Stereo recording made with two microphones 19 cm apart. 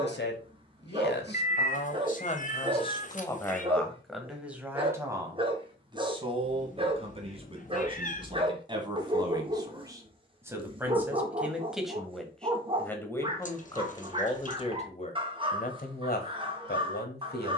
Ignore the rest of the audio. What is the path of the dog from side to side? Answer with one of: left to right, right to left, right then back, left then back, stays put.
stays put.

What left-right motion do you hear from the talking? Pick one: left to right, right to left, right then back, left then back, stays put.
right then back.